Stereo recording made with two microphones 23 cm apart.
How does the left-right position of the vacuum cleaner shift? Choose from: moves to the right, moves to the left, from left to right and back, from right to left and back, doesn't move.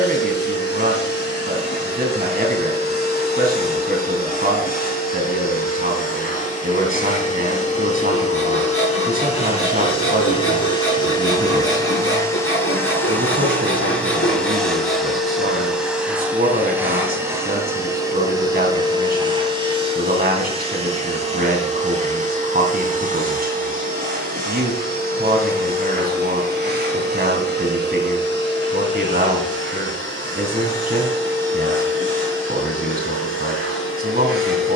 moves to the right.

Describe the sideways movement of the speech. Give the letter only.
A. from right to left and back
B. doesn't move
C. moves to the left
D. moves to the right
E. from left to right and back
B.